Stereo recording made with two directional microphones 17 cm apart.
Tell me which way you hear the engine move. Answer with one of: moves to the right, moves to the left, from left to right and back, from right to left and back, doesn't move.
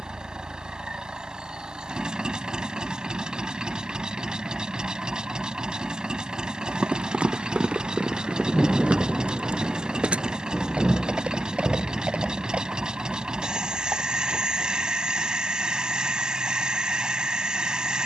doesn't move.